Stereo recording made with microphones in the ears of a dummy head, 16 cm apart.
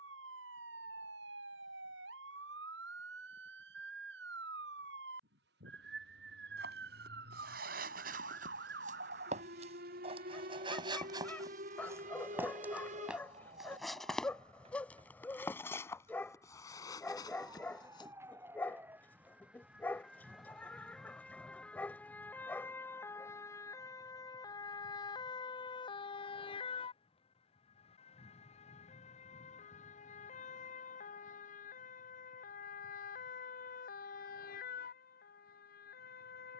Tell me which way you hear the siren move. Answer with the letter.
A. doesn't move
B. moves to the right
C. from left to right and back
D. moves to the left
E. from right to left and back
D.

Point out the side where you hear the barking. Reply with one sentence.
You can hear the barking in the centre.